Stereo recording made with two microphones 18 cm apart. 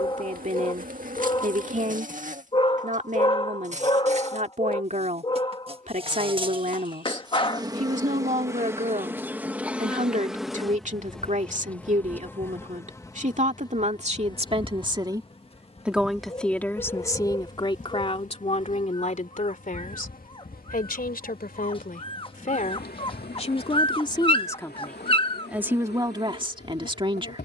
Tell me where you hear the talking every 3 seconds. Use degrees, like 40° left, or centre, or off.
40° right, 40° right, 40° right, 40° right, 40° right, 10° left, 40° left, 40° left, 10° right.